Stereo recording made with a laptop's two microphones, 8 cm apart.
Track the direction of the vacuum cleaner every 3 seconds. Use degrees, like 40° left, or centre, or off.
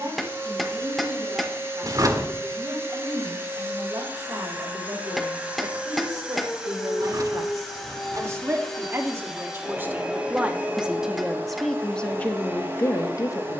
30° right, 20° right, centre, 20° right, 30° right.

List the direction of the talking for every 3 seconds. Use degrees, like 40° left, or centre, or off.
50° right, 50° right, 40° right, 10° right, 30° left.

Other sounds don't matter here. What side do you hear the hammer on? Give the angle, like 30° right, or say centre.
centre.